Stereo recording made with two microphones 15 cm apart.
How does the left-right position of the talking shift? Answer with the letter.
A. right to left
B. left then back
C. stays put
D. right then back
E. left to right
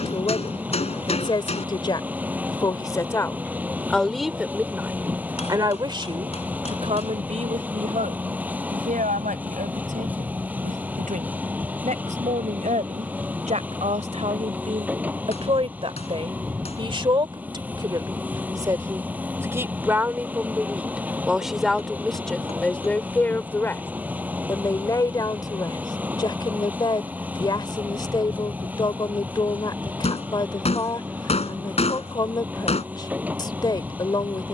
D.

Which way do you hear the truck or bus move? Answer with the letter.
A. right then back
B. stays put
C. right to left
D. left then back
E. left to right
B.